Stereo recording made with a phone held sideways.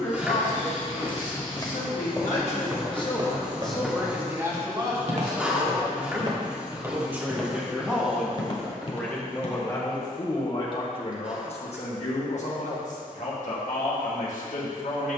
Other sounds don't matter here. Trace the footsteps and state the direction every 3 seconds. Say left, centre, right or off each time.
left, right, centre, left, off.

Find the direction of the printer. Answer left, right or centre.
centre.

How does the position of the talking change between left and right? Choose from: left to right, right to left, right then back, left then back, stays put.
right then back.